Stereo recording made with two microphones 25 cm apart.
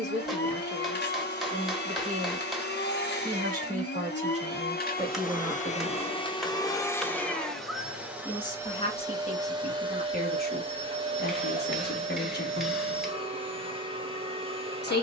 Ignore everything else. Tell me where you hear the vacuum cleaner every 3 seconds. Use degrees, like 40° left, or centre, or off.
40° left, 40° left, centre, 20° right, 20° right.